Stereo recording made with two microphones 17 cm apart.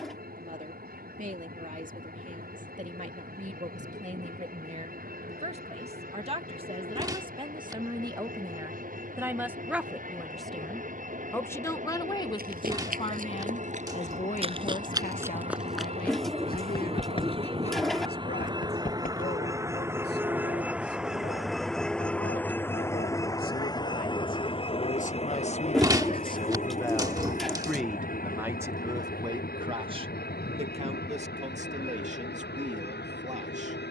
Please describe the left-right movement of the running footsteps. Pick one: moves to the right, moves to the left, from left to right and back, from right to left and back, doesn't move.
moves to the left.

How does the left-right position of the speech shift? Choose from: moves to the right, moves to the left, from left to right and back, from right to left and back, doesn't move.
from right to left and back.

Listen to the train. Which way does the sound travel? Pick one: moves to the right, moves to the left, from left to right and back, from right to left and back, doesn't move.
moves to the left.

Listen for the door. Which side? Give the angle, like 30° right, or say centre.
20° right.